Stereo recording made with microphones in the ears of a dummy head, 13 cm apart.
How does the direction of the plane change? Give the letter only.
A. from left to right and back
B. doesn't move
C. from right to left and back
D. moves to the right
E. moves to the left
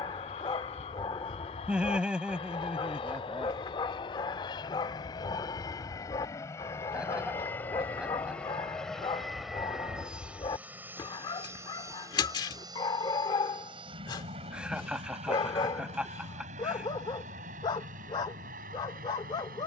D.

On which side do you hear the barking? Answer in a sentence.
You can hear the barking on the left.